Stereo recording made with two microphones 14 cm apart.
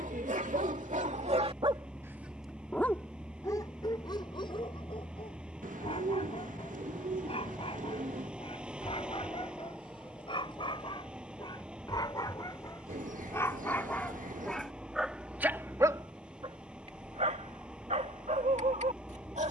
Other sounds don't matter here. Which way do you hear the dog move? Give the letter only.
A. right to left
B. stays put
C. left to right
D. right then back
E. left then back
E.